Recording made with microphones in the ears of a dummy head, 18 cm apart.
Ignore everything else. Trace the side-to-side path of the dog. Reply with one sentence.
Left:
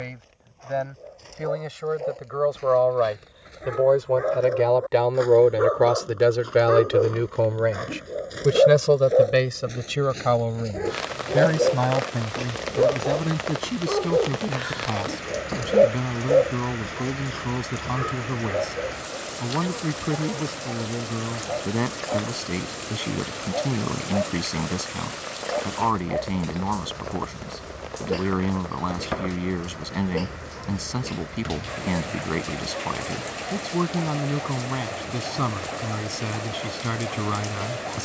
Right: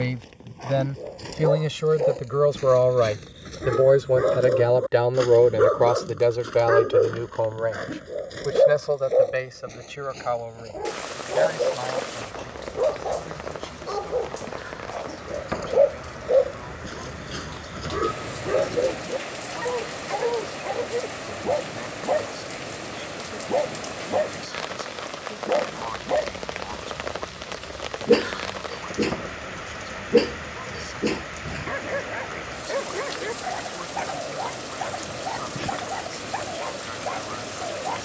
In this clip you hear the dog go left and come back.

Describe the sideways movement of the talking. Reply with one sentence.
In this clip you hear the talking move from right to left.